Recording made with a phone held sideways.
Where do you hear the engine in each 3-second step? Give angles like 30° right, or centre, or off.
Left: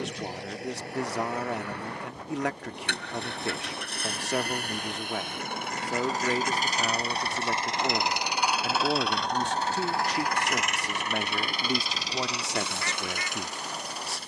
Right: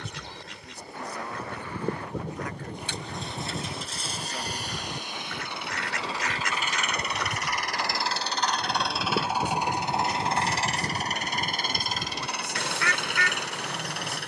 70° left, 50° left, 20° left, 30° right, 60° right.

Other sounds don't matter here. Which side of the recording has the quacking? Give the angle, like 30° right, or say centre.
80° right.